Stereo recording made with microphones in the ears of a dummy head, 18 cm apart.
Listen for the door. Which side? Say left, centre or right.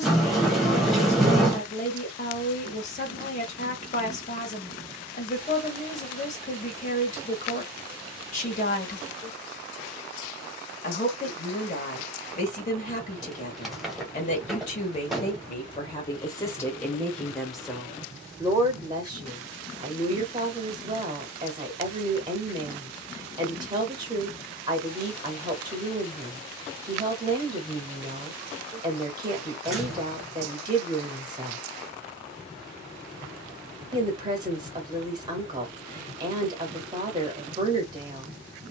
centre.